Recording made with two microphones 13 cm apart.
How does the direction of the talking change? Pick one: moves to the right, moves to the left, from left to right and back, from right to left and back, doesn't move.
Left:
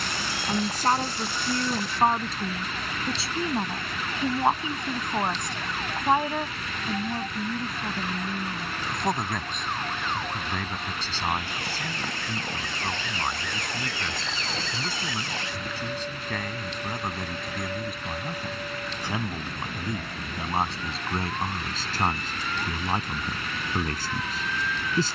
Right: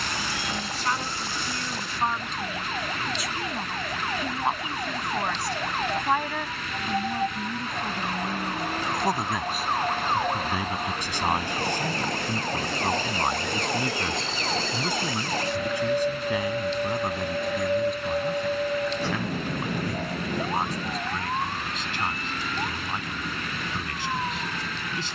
from left to right and back.